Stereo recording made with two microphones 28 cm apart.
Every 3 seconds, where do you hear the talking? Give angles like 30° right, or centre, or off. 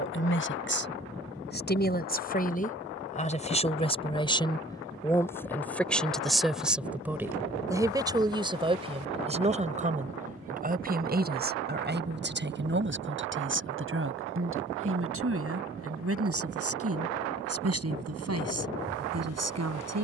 30° left, 10° left, 10° right, 30° right, 40° right, 50° right, 60° right.